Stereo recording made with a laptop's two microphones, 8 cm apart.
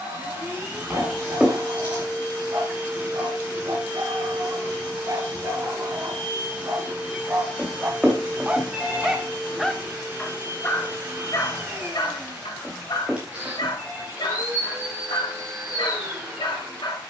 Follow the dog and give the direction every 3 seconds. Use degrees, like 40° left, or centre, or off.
60° right, 50° right, 30° right, 30° left, 70° left, 70° left.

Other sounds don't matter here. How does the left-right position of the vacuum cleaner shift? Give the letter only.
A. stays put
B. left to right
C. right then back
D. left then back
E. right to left
A.